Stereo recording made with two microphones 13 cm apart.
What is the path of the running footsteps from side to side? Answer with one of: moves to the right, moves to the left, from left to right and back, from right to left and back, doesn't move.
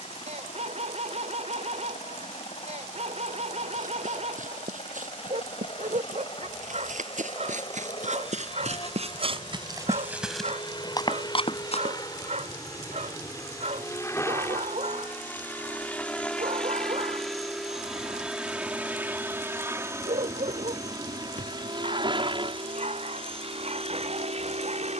moves to the left.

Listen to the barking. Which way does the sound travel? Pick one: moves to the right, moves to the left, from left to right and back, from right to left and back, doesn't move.
doesn't move.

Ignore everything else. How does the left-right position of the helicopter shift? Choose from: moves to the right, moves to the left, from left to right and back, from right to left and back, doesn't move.
moves to the right.